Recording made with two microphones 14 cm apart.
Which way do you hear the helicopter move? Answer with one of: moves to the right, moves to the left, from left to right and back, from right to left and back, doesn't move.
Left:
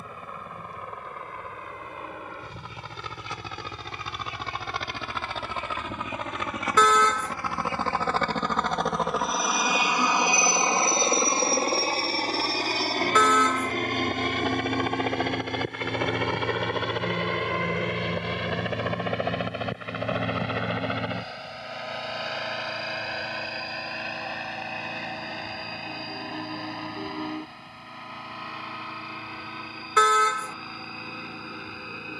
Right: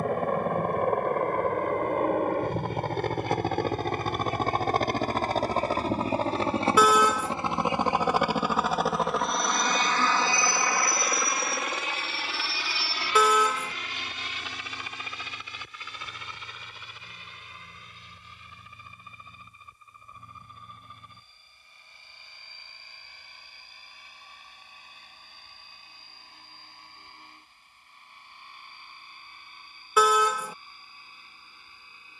moves to the left.